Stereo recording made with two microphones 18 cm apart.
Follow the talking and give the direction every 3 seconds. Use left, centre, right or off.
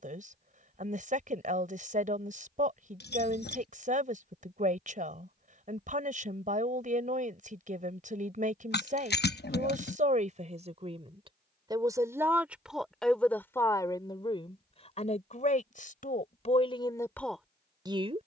right, right, right, right, centre, left.